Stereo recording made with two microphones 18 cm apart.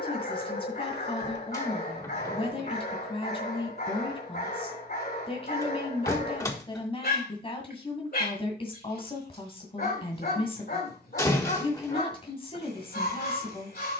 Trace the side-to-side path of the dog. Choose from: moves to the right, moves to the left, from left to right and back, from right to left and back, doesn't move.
doesn't move.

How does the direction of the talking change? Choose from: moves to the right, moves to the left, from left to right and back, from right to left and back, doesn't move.
doesn't move.